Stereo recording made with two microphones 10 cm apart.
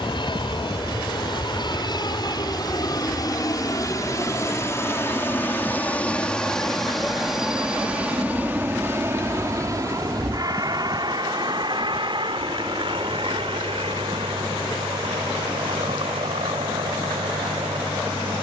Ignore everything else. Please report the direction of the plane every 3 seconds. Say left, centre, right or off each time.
left, left, centre, right, right, right.